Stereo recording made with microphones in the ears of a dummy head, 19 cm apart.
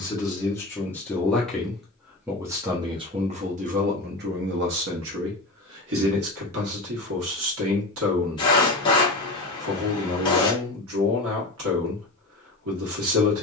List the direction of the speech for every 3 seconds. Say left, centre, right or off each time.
centre, right, right, right, right.